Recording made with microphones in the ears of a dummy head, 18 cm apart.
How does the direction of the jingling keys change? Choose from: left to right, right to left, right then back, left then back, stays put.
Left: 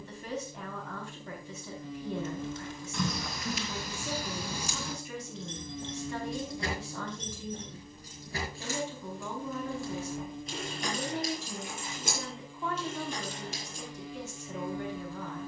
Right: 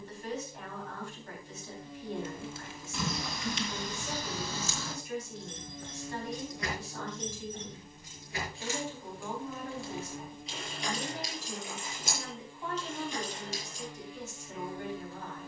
right to left.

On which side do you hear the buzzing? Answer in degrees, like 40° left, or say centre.
70° left.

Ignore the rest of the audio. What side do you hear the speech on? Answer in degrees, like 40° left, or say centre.
70° left.